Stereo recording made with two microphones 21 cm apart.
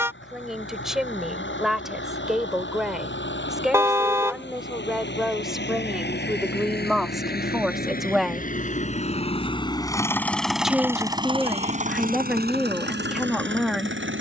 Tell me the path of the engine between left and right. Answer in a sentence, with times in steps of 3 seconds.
You can hear the engine on the left from 0 s, in the centre from 9 s and on the right from 12 s.